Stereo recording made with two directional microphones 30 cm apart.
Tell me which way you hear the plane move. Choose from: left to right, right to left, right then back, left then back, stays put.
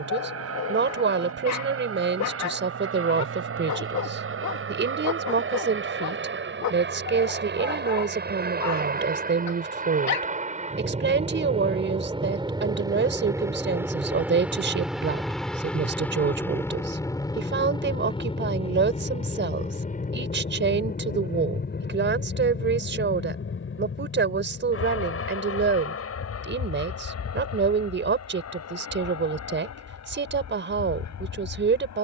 right to left.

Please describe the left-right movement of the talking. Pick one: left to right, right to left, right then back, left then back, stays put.
stays put.